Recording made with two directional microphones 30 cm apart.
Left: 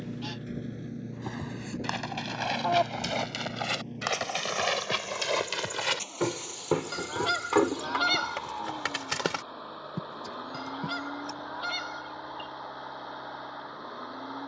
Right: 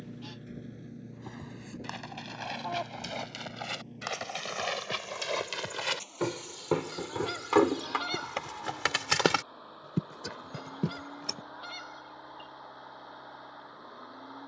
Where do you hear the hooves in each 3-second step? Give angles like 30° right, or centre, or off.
50° left, 40° left, centre, 50° right, off.